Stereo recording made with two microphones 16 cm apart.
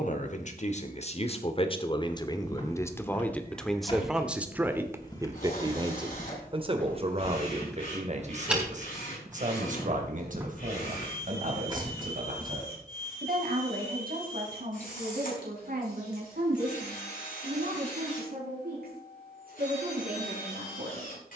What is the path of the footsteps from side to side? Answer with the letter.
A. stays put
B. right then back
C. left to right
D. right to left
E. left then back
C.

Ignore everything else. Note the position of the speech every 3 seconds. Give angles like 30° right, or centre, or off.
40° left, 10° right, 40° right, 60° right, 60° right, 70° right, 70° right.